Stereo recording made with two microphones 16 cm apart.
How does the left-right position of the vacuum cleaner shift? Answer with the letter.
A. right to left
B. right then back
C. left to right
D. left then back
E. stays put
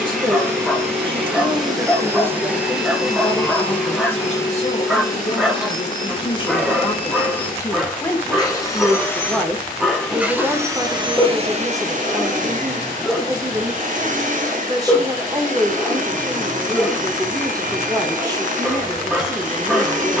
D.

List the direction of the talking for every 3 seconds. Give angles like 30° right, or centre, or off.
20° right, 30° left, 20° left, 10° right, 20° right, 20° right, 20° right.